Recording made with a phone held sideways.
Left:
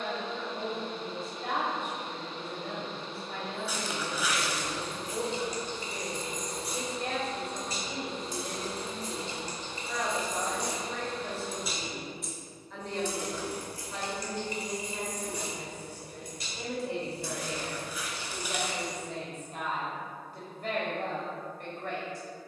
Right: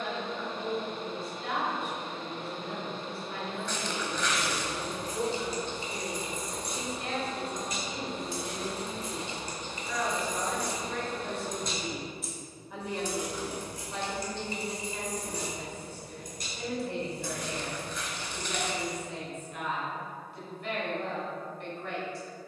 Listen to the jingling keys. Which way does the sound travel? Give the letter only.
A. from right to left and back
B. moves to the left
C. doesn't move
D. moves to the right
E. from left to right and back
A.